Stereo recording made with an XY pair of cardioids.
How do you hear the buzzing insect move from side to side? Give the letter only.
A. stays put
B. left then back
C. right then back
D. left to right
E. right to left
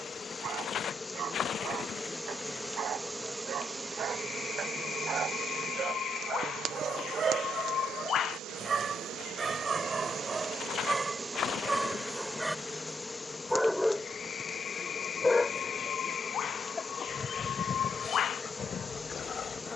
C.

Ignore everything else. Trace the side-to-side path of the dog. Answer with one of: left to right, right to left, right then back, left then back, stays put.
right to left.